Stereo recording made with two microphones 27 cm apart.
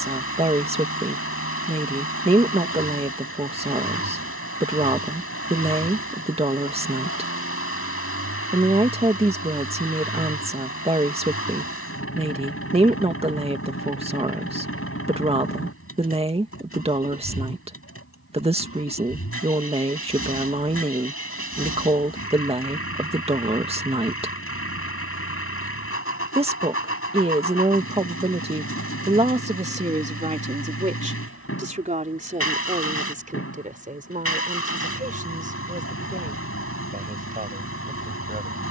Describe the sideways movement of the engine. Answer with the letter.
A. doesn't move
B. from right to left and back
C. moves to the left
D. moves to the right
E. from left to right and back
A.